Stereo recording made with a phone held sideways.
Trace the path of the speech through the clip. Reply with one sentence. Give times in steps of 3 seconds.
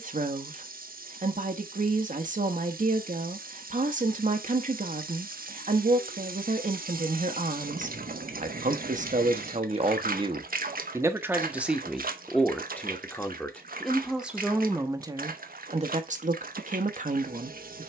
You can hear the speech on the right from 0 s, in the centre from 12 s and on the right from 15 s.